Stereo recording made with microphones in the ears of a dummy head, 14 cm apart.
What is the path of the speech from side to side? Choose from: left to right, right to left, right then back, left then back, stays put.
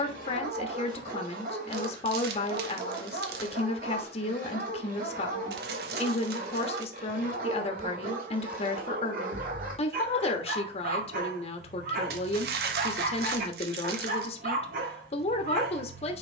stays put.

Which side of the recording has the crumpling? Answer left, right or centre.
right.